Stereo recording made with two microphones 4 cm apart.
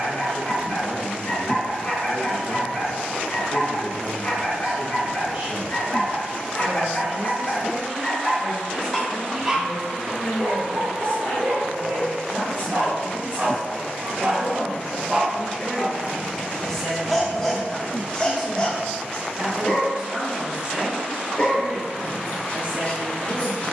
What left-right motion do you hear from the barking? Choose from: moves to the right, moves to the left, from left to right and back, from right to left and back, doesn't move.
from left to right and back.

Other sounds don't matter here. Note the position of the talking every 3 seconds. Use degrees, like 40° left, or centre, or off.
40° right, 40° right, 40° right, 30° left, 50° left, 20° left, 20° right, 30° right.